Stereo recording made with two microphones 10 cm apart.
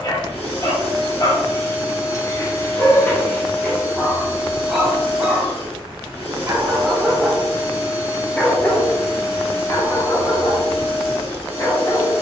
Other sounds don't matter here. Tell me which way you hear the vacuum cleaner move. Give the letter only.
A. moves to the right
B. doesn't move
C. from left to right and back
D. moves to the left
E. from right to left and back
B.